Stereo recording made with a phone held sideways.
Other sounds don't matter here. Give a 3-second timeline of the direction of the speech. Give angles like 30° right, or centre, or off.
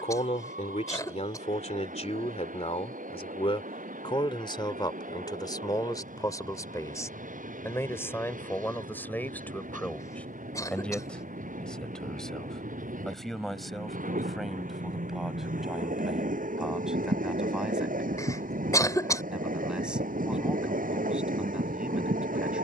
50° left, 30° left, 20° left, 10° left, centre, centre, 10° right, 10° right.